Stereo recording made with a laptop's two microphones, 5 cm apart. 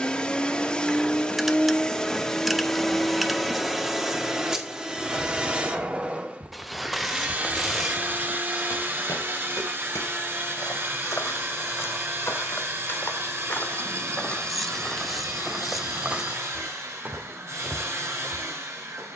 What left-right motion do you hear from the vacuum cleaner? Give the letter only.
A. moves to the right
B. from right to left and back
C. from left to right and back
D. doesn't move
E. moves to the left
A.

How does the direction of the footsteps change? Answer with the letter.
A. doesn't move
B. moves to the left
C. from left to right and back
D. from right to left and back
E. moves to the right
D.